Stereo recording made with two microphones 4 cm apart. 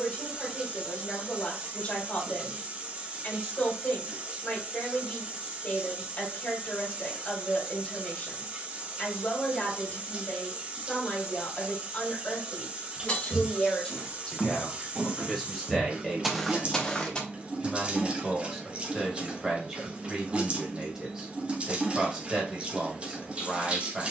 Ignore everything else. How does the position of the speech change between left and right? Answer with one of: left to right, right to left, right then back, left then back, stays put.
left to right.